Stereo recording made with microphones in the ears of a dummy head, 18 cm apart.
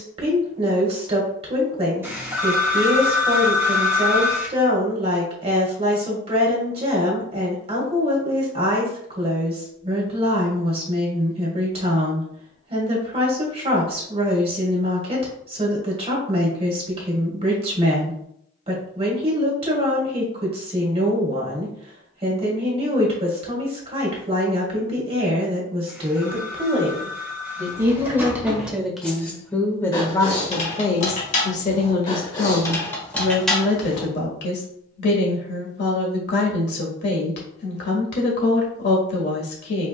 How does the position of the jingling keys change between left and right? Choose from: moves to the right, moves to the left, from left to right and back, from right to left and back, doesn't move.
from right to left and back.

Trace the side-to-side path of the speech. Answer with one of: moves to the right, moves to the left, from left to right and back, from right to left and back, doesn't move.
moves to the left.